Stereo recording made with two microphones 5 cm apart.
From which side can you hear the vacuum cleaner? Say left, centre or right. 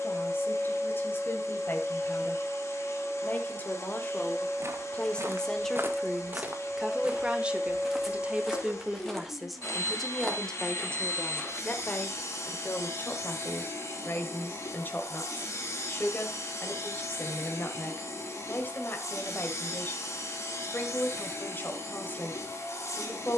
left.